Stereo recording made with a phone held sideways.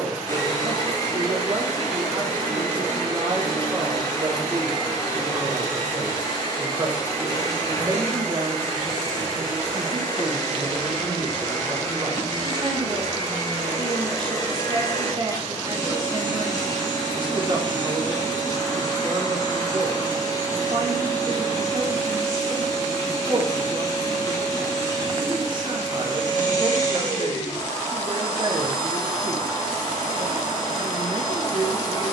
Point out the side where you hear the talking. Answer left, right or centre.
right.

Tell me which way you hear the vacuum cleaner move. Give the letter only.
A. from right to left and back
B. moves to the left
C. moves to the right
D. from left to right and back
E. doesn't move
E.